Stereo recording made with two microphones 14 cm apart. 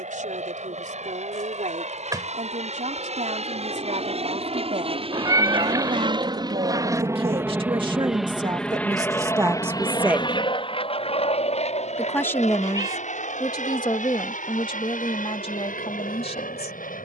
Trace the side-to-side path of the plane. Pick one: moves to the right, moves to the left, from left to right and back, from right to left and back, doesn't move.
moves to the left.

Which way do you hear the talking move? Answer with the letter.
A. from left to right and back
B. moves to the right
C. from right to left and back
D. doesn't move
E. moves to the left
E.